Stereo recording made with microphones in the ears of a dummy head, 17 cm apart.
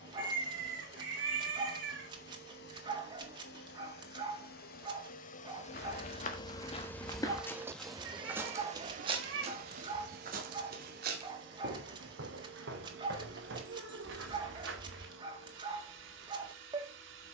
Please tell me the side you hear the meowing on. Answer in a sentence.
In this clip you hear the meowing on the right.